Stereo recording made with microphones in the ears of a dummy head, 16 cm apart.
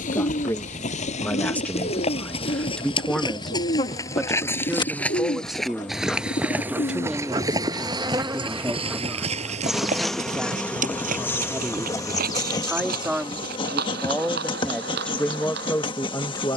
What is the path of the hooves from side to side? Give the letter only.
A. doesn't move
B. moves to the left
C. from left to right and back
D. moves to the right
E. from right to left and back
D.